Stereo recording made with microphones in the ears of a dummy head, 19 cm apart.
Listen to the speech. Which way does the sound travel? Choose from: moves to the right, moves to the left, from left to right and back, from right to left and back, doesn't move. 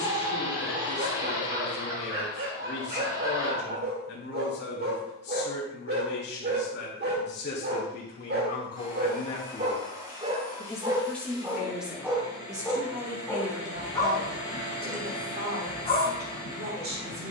moves to the right.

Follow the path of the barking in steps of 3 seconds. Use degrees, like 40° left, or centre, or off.
50° right, 50° right, 50° right, 30° right, 10° left, 30° left.